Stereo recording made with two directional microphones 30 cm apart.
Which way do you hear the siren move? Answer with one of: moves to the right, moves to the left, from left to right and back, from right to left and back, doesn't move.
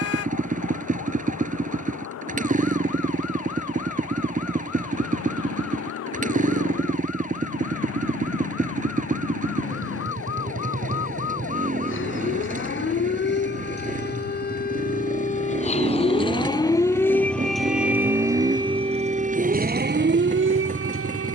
moves to the right.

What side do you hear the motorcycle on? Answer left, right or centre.
right.